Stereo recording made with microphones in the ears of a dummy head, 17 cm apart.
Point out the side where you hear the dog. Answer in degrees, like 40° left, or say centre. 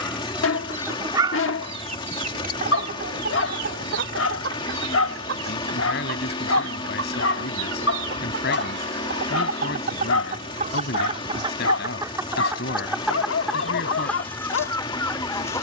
70° left.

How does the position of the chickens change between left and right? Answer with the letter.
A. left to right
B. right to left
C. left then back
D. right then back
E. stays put
D.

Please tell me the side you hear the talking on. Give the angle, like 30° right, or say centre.
60° left.